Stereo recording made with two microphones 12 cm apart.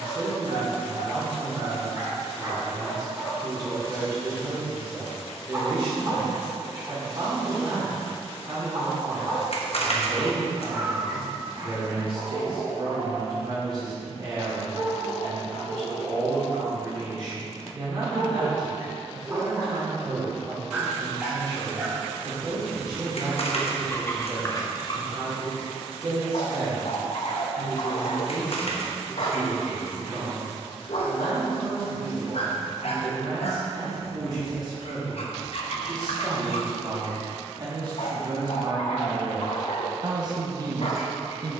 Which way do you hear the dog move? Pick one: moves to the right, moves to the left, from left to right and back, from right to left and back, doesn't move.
moves to the left.